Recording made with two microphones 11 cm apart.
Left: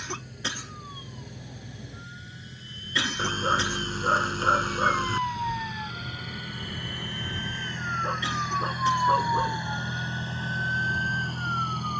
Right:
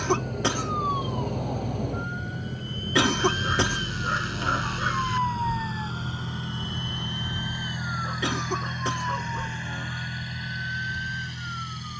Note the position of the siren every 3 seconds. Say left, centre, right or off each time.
right, right, left, left.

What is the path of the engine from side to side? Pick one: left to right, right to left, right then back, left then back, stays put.
right to left.